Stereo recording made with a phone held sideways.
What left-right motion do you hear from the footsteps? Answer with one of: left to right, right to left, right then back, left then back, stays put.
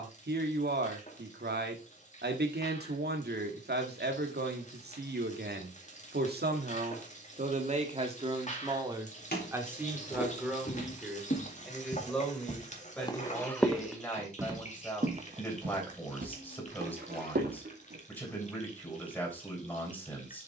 left to right.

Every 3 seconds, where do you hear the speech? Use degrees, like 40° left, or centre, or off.
70° right, 70° right, 50° right, 10° right, 10° left, 10° left, 10° left.